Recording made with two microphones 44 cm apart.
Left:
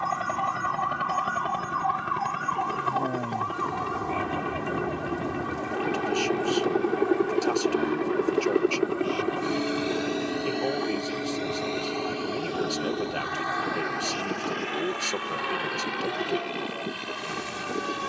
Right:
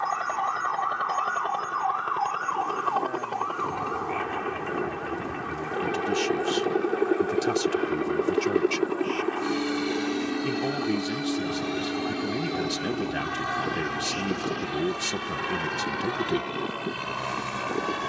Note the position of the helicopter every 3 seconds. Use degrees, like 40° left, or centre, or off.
40° left, 30° left, 10° left, 20° right, 40° right, 60° right.